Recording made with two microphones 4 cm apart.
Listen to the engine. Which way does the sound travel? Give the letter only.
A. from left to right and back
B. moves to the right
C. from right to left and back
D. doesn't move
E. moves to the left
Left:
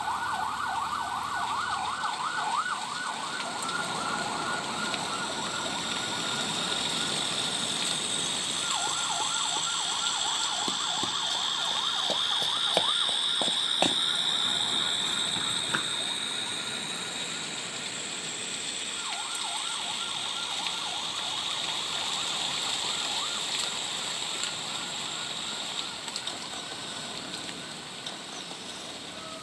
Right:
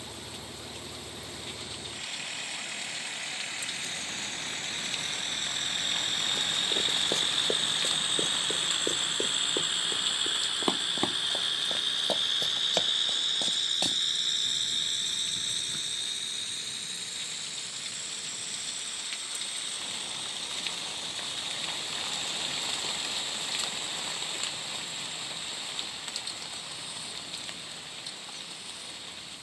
E.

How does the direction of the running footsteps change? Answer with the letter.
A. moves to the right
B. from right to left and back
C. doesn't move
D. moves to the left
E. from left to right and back
D.